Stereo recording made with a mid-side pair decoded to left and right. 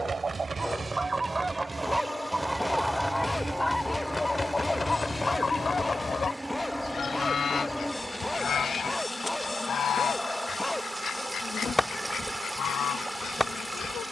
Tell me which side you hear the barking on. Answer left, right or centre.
centre.